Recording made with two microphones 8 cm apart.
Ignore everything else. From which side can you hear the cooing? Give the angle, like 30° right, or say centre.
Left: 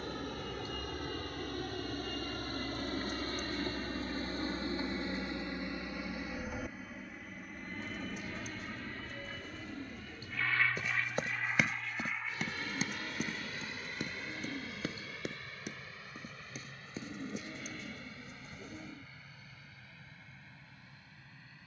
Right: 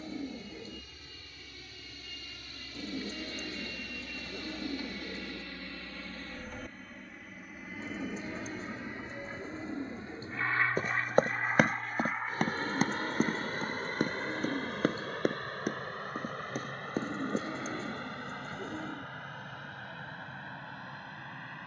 30° right.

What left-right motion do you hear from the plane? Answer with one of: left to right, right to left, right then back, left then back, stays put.
left to right.